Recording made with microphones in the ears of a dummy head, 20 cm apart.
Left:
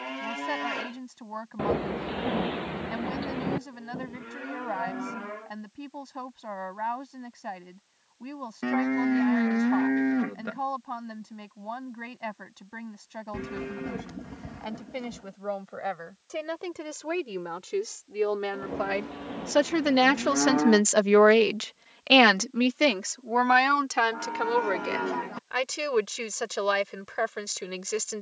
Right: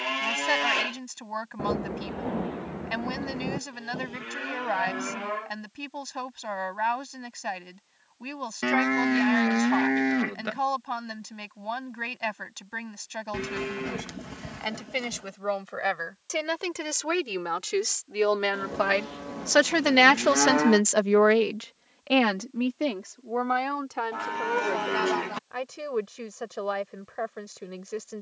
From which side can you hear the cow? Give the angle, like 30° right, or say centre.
70° right.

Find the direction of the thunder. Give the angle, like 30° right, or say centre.
70° left.